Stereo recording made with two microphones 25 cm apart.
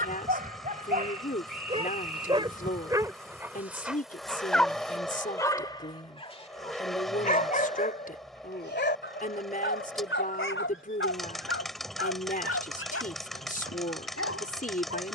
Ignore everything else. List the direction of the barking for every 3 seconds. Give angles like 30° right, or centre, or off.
30° right, centre, 30° left, 50° left, 60° left.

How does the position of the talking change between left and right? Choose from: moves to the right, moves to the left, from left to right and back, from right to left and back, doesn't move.
doesn't move.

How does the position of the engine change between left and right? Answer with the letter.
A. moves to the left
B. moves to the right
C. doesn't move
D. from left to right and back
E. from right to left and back
C.